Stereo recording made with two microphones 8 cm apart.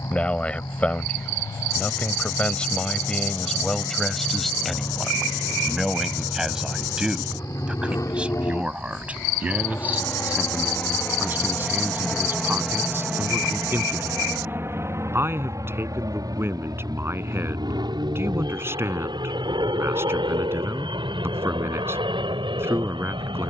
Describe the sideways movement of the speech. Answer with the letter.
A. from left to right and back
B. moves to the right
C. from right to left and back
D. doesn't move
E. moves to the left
B.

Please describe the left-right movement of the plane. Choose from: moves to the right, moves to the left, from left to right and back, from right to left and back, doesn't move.
moves to the right.